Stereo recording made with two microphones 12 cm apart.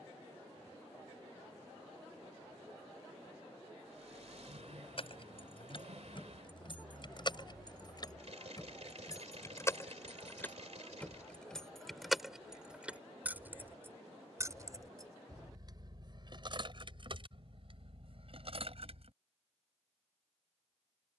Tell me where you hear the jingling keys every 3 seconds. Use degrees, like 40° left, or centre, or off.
off, 50° left, 40° left, 20° left, 20° right, 40° right, 50° right.